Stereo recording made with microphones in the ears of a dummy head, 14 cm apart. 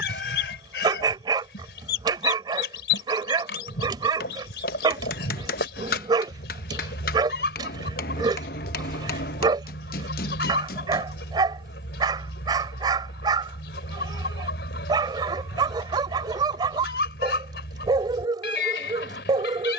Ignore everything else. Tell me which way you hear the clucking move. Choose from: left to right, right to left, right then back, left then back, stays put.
stays put.